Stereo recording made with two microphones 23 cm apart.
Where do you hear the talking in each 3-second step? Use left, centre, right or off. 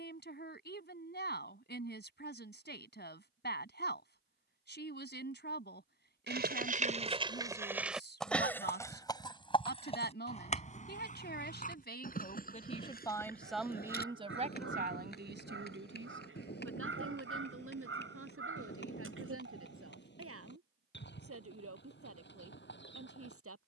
left, left, left, left, centre, right, right, right.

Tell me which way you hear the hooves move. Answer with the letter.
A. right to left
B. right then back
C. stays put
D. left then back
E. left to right
A.